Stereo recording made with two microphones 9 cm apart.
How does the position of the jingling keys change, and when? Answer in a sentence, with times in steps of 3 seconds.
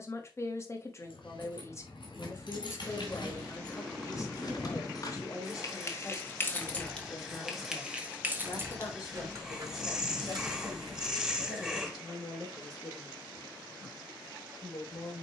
In this clip you hear the jingling keys on the left from 0 s, in the centre from 6 s, on the right from 9 s and not at all from 12 s.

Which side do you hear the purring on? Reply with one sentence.
In this clip you hear the purring in the centre.